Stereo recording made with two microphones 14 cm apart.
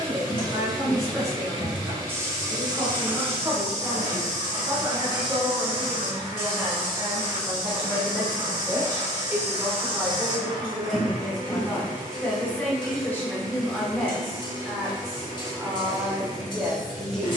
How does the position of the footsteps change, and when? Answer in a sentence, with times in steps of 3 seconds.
You can hear the footsteps in the centre from 0 s, on the right from 3 s and not at all from 12 s.